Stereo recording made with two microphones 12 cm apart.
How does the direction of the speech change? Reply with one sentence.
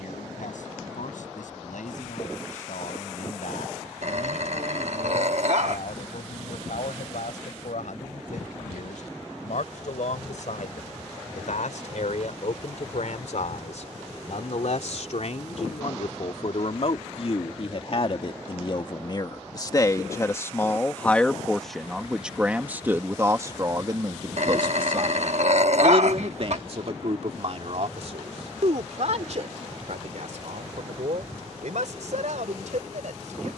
In this clip you hear the speech travel towards the right.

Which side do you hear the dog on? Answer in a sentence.
In this clip you hear the dog on the right.